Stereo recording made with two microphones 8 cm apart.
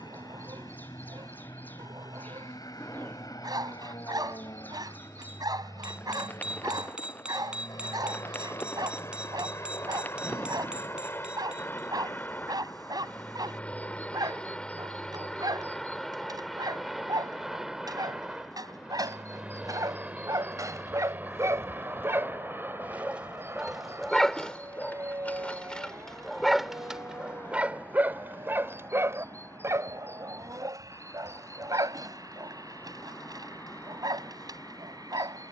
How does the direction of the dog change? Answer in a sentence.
You can hear the dog go left and come back.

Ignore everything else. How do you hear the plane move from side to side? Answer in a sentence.
You can hear the plane go from the left side to the right.